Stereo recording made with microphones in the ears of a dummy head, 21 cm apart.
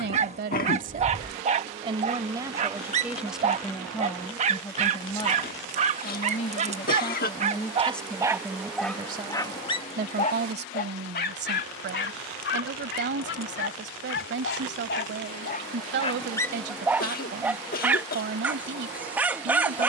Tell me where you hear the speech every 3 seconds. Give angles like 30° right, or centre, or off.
30° right, 10° left, 10° left, 40° right, 50° right, 50° right, 50° right.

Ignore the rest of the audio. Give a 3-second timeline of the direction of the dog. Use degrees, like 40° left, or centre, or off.
30° right, 30° right, 20° right, 30° left, 60° left, 10° left, 10° right.